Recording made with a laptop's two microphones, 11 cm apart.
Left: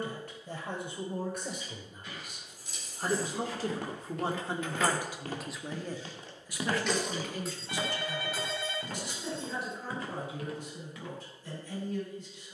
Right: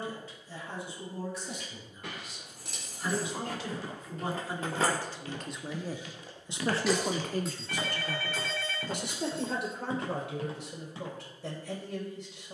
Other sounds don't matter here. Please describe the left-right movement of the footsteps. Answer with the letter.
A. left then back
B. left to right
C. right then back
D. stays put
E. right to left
B.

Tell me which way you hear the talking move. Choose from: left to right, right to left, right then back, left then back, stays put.
left to right.